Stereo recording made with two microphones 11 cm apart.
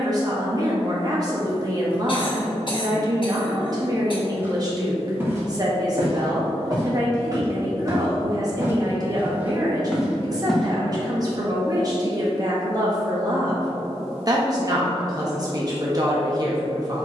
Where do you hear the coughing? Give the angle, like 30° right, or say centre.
50° left.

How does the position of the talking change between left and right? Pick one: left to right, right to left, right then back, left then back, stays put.
stays put.